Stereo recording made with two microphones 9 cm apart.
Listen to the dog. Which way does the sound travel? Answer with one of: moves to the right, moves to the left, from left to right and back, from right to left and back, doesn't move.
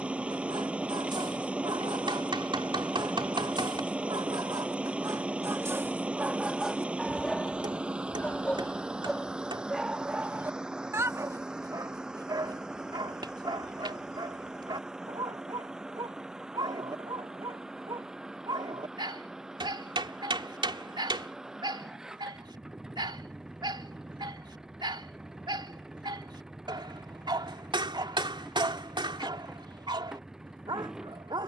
from right to left and back.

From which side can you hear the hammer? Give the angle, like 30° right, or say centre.
60° right.